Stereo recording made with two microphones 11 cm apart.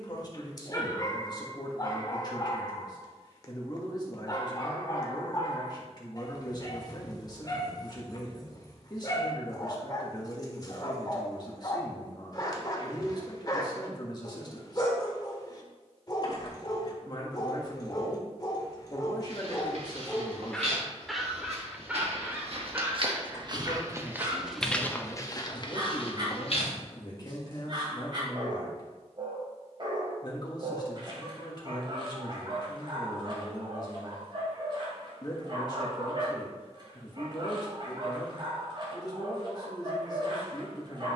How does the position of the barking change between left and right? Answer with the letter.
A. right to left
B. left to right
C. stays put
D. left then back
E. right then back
B.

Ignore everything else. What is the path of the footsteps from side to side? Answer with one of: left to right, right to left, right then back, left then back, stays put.
right to left.